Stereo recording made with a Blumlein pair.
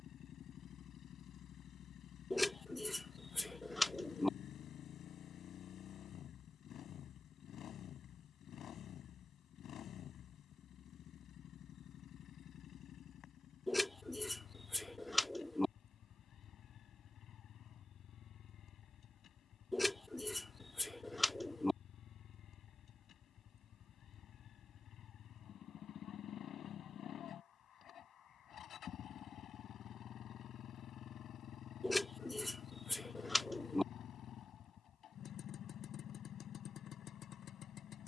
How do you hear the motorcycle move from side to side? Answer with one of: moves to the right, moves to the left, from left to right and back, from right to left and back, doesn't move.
doesn't move.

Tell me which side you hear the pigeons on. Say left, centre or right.
centre.